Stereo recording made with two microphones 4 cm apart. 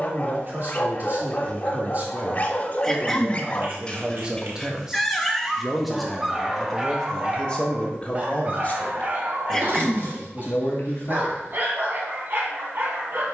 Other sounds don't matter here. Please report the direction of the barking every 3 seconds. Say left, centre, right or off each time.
left, centre, right, right, right.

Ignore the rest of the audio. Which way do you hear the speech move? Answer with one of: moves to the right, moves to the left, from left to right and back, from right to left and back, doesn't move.
moves to the left.